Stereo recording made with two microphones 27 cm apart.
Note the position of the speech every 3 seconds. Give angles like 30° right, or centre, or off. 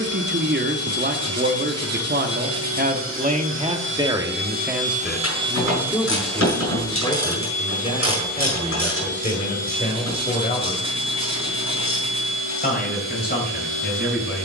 40° right, 10° right, 20° left, 30° left, 40° left.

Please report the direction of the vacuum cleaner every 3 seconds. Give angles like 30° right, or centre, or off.
70° right, 40° right, 20° left, 50° left, 50° left.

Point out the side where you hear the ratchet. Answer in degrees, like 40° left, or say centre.
60° left.